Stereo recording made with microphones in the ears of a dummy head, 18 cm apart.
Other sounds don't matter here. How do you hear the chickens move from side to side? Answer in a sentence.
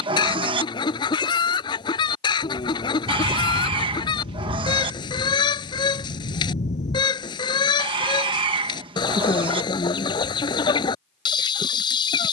In this clip you hear the chickens stay in one place.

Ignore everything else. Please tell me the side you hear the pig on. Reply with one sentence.
In this clip you hear the pig on the right.